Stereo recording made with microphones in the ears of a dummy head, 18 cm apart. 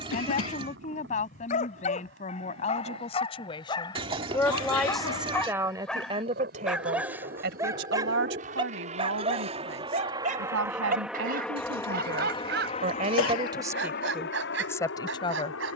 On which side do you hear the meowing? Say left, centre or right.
right.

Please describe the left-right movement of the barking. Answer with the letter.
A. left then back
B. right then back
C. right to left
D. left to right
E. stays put
D.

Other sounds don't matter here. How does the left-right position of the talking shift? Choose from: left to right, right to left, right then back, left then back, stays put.
right then back.